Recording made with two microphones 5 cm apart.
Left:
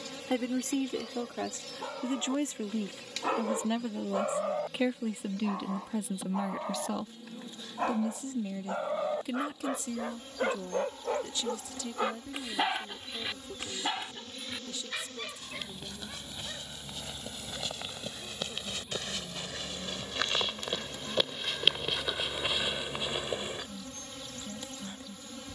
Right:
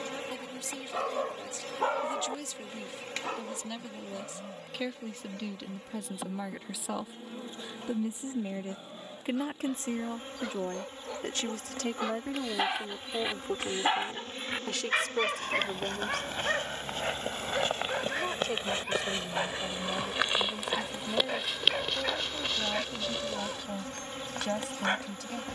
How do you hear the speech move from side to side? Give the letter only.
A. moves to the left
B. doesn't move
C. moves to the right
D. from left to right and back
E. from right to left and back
C.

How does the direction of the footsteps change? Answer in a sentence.
You can hear the footsteps move to the left.